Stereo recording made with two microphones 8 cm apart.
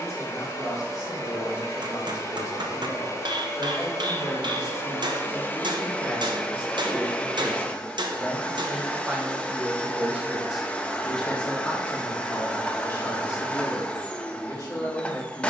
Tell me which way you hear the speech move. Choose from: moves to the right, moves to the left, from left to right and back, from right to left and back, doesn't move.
from left to right and back.